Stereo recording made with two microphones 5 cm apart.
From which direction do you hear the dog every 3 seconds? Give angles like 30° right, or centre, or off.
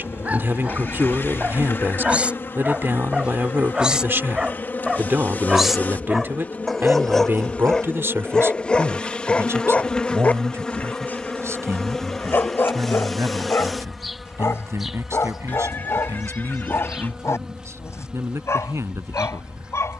30° right, 10° right, 10° left, 30° left, 50° left, 70° left, 70° left.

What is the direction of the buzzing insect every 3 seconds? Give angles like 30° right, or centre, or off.
50° left, 40° left, 30° left, 20° left, centre, 10° right, 20° right.